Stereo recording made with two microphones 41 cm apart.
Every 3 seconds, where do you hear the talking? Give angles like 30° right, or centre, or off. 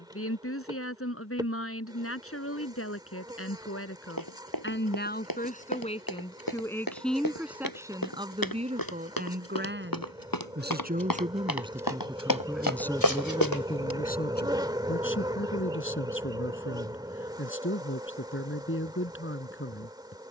30° left, 30° left, centre, 20° right, 10° left, 30° left, 30° left.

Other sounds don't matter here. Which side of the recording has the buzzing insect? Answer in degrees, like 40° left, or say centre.
10° right.